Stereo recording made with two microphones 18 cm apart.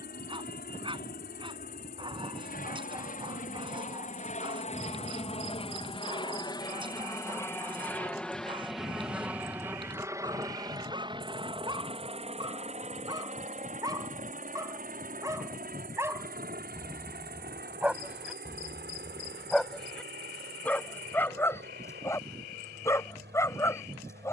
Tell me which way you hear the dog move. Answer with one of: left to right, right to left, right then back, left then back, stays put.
right to left.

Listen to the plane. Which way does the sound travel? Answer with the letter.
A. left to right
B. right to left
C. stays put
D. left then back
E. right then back
A.